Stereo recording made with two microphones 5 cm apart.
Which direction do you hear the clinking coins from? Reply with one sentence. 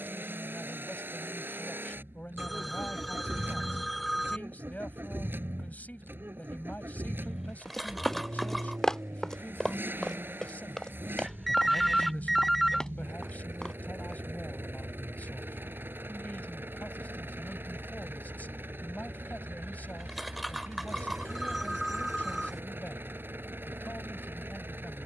You can hear the clinking coins in the centre.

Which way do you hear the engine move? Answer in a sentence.
You can hear the engine stay put.